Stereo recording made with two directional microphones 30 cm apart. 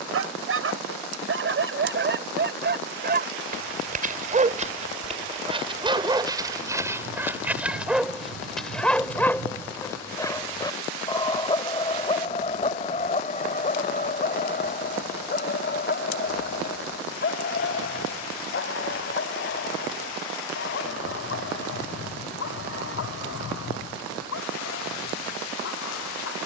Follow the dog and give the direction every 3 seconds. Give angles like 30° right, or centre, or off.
40° right, 20° right, 10° right, 10° left, 30° left, 40° left, 40° left, 50° left, 50° left.